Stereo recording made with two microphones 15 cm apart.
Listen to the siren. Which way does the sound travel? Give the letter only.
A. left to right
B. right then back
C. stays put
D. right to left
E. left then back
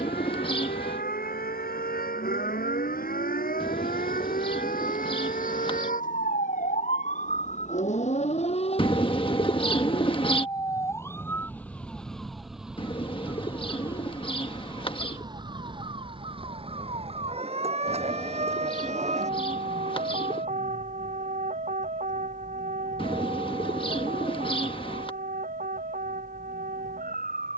A.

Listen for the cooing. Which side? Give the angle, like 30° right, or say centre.
30° left.